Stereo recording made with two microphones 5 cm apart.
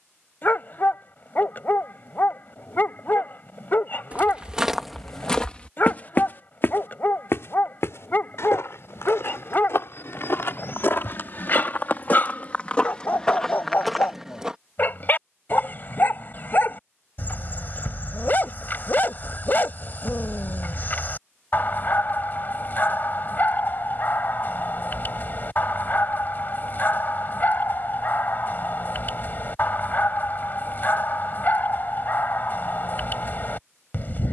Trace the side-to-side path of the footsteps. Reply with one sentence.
In this clip you hear the footsteps move from right to left and back again.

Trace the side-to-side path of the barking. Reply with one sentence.
In this clip you hear the barking stay put.